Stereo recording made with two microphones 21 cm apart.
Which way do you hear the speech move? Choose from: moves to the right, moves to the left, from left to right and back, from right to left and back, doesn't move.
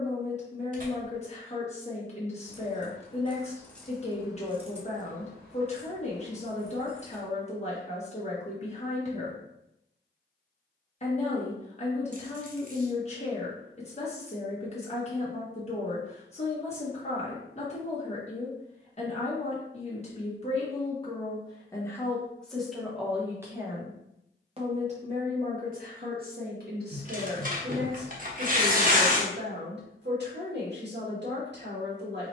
moves to the right.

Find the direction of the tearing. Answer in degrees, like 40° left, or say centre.
40° right.